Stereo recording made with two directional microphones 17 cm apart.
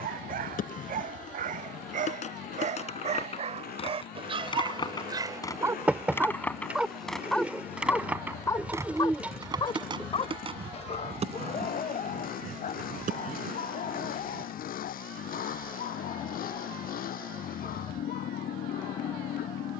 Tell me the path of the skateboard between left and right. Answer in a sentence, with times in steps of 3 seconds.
In this clip you hear the skateboard on the left from 0 s, in the centre from 6 s, on the right from 9 s and not at all from 15 s.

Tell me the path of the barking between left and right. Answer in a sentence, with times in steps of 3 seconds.
In this clip you hear the barking on the right from 0 s, in the centre from 6 s and on the left from 9 s.